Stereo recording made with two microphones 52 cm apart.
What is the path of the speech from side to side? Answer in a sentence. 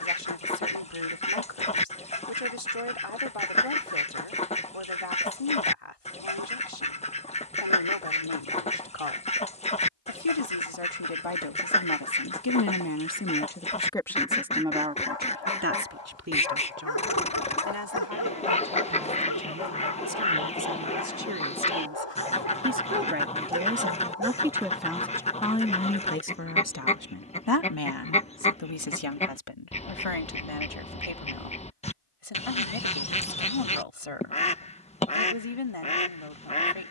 You can hear the speech go right and come back.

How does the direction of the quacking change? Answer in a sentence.
You can hear the quacking stay in one place.